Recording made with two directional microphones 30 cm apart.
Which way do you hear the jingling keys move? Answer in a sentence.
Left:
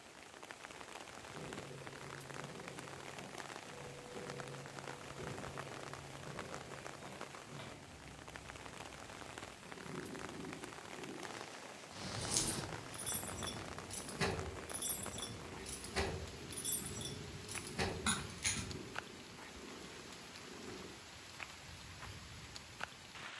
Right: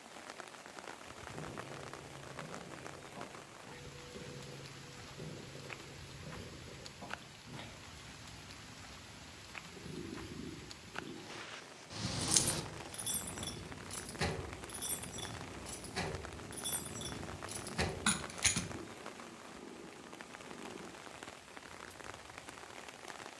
You can hear the jingling keys go left and come back.